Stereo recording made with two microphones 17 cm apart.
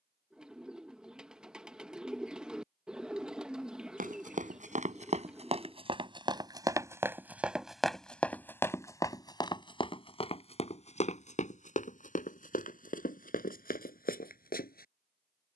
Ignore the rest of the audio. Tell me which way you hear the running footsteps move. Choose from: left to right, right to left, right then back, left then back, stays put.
right to left.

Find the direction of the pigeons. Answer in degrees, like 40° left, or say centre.
centre.